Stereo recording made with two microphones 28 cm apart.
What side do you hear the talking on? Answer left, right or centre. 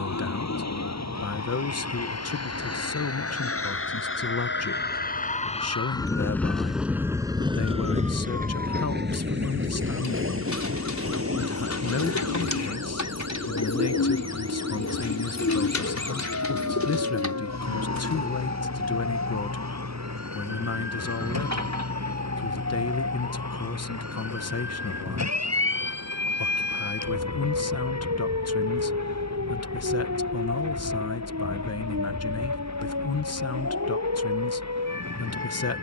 left.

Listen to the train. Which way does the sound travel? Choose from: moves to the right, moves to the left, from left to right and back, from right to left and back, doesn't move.
moves to the right.